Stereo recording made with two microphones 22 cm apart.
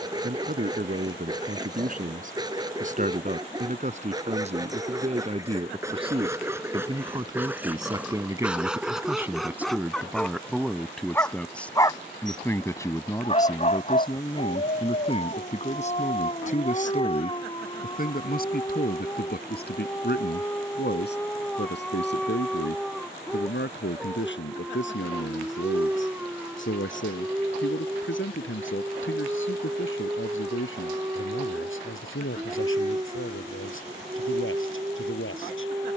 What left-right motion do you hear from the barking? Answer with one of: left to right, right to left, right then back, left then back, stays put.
left then back.